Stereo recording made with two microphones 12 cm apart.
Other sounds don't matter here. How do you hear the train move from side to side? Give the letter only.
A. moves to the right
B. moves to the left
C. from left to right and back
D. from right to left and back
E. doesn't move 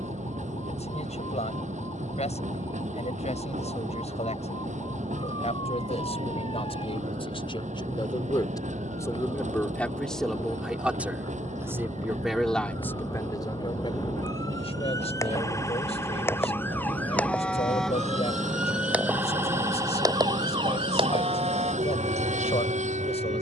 E.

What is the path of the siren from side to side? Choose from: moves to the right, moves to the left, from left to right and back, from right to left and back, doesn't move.
moves to the right.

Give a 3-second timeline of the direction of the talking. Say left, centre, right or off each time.
left, left, left, centre, left, left, left, left.